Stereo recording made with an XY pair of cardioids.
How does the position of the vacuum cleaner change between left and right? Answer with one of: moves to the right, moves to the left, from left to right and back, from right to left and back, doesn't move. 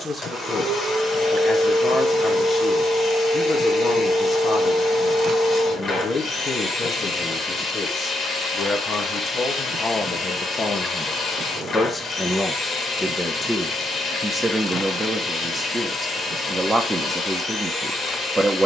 doesn't move.